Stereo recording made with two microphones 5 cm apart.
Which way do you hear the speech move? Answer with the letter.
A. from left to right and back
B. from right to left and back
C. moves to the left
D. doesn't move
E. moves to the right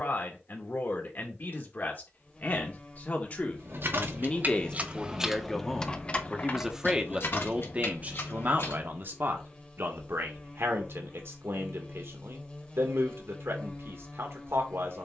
E.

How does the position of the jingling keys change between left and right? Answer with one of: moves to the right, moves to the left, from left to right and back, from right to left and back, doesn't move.
moves to the left.